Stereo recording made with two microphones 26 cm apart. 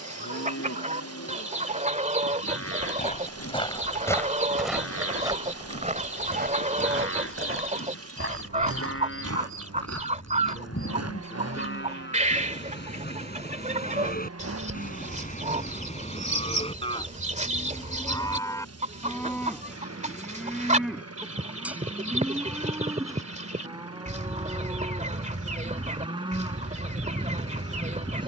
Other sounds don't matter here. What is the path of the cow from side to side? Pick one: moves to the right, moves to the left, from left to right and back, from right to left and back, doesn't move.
moves to the right.